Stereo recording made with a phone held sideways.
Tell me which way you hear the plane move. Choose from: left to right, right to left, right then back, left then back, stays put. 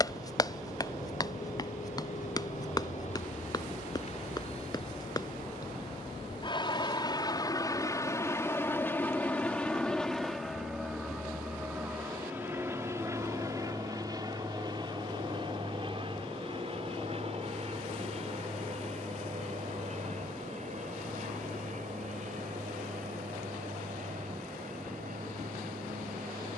left to right.